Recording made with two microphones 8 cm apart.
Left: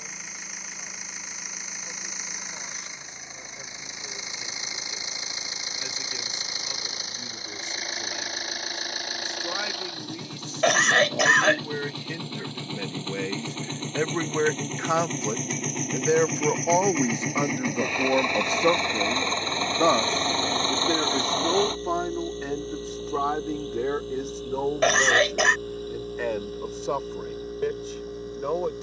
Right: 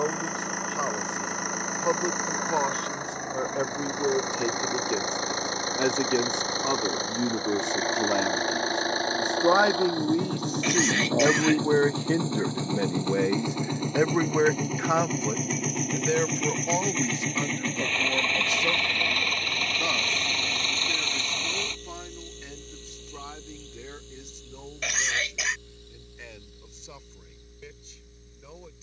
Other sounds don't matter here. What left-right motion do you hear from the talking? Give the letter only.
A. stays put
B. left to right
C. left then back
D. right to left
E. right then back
D.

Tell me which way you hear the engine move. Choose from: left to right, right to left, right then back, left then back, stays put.
right to left.